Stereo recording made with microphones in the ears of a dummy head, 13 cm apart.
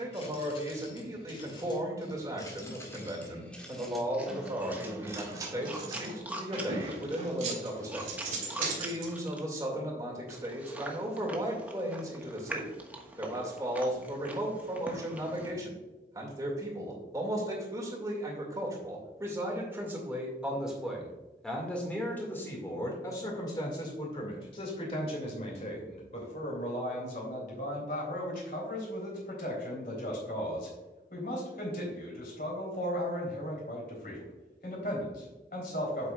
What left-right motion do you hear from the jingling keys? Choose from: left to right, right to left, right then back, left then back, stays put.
left to right.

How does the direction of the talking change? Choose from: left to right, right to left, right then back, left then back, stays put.
right to left.